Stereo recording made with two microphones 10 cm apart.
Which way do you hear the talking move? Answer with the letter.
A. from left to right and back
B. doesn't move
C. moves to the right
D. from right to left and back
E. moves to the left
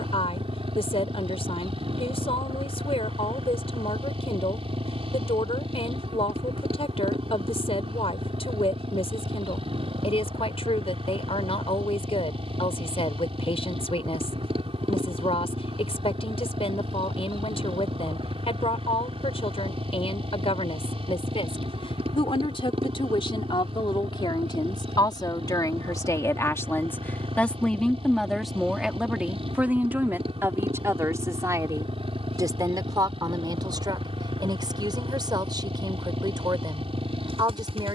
C.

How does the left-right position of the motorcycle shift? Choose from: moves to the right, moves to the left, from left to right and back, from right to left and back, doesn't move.
doesn't move.